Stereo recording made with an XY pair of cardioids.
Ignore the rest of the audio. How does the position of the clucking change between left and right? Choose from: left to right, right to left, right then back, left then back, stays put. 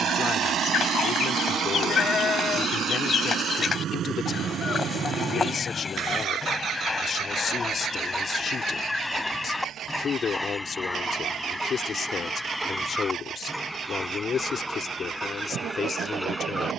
left to right.